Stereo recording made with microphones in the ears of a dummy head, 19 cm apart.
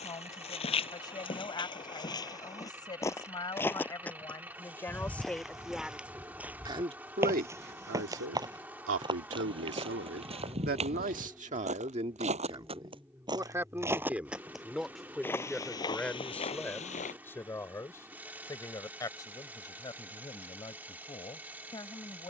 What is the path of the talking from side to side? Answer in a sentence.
In this clip you hear the talking move from left to right and back again.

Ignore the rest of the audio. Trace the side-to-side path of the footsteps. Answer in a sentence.
You can hear the footsteps move from left to right and back again.